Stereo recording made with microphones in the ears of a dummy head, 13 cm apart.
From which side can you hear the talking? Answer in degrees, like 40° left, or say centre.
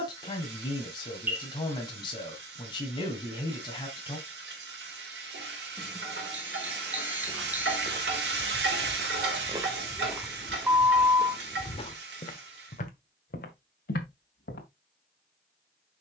30° left.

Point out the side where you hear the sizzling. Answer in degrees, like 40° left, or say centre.
80° right.